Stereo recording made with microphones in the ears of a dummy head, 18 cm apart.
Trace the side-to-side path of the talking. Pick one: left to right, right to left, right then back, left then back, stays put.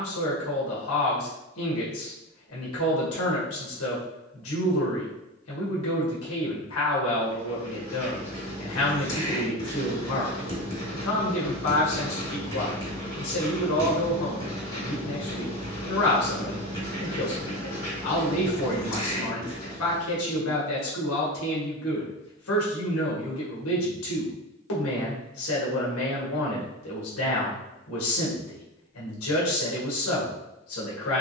stays put.